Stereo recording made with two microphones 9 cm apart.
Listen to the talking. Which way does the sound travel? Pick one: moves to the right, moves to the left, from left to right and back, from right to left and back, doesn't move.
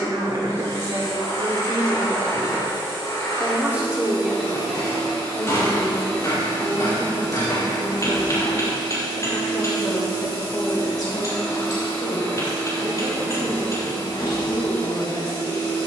moves to the left.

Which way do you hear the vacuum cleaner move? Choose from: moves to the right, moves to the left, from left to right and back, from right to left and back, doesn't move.
doesn't move.